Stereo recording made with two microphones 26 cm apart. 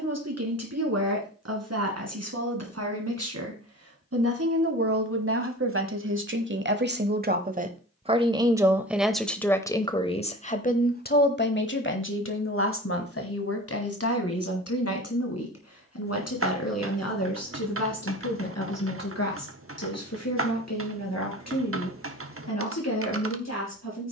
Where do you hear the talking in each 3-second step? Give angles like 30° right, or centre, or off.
70° right, 60° right, 30° right, 30° left, 60° left, 70° left, 70° left, 80° left.